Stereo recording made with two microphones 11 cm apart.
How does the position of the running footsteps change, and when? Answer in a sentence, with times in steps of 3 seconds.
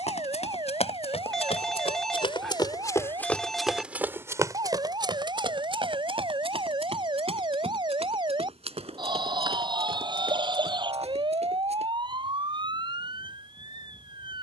You can hear the running footsteps on the left from 0 s, on the right from 3 s and not at all from 12 s.